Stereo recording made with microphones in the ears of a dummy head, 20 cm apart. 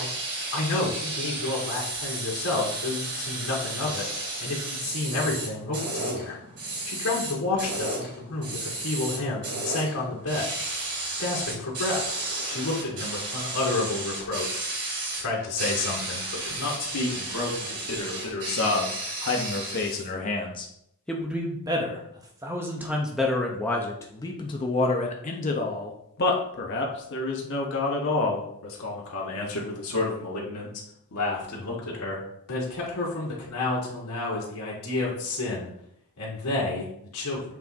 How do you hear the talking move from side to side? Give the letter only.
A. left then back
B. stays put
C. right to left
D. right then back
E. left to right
D.